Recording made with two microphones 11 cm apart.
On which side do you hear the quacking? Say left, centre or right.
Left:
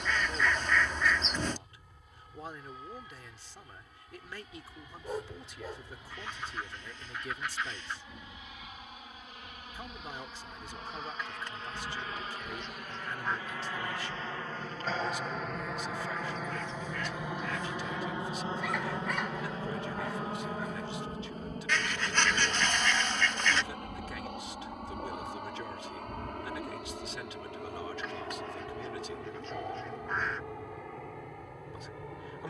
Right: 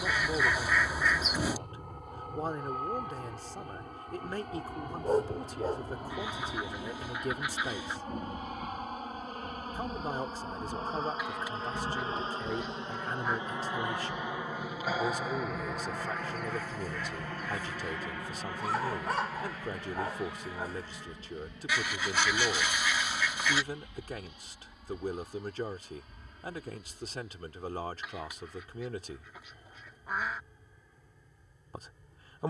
centre.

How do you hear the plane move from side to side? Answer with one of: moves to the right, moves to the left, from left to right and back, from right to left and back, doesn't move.
moves to the left.